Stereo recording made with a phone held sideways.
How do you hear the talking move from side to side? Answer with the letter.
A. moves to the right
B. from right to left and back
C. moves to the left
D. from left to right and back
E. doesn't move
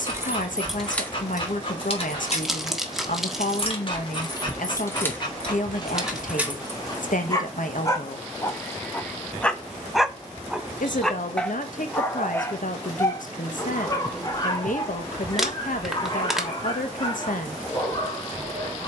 E.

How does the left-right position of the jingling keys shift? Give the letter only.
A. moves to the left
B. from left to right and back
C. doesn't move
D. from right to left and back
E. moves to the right
D.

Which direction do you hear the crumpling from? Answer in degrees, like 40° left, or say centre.
centre.